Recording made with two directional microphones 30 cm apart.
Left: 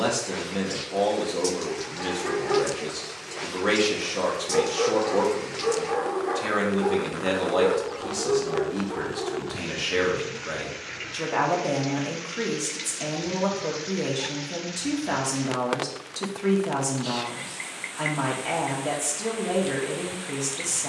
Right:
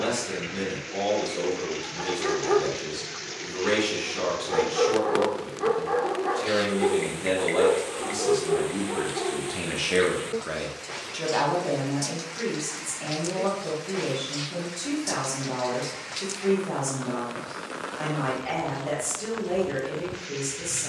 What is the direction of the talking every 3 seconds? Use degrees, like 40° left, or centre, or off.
40° left, 40° left, 20° left, centre, 30° left, 30° left, 30° left.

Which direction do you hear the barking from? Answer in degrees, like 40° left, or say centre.
40° right.